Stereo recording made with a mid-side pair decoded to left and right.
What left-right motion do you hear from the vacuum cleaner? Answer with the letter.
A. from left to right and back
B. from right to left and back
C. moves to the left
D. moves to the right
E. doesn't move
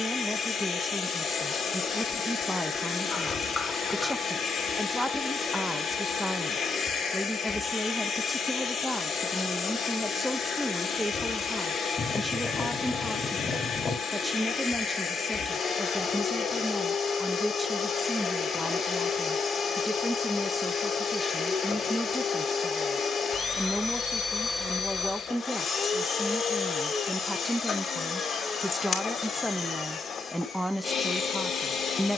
E.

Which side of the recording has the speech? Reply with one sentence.
You can hear the speech in the centre.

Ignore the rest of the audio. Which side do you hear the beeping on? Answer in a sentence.
You can hear the beeping on the left.